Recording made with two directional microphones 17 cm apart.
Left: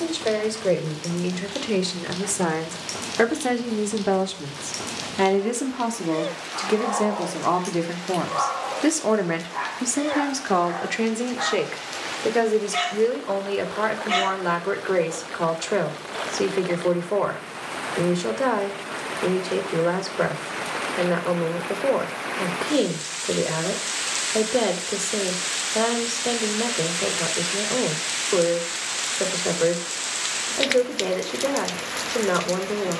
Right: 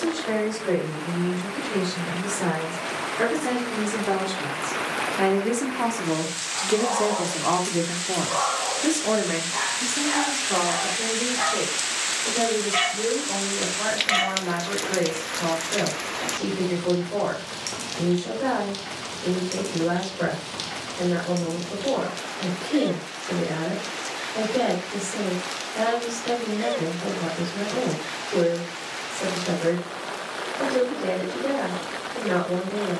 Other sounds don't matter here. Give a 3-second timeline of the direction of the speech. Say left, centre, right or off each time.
left, left, centre, left, left, left, left, left, left, left, left.